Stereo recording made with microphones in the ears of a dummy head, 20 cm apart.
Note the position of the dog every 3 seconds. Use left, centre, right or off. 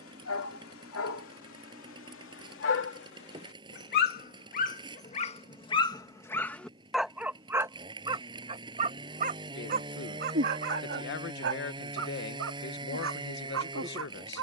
left, left, centre, right, right.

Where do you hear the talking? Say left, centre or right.
left.